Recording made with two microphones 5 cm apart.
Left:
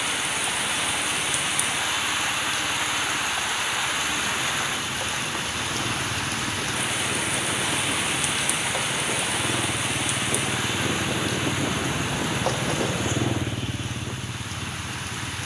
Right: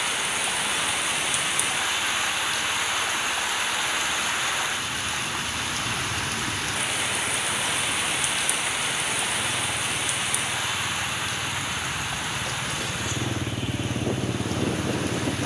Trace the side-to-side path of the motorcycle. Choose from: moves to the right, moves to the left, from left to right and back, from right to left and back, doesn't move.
moves to the right.